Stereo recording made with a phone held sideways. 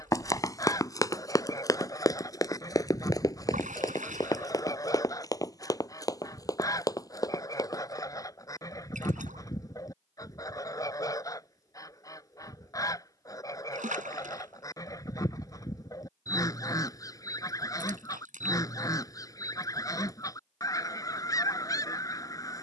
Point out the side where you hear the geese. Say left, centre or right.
left.